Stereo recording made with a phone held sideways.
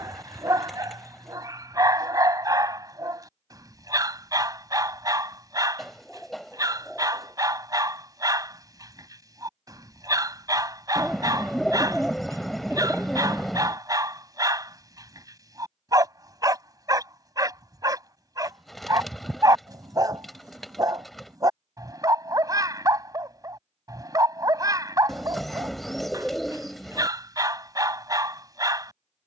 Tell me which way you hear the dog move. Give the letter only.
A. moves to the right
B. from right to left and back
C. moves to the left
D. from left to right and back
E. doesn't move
E.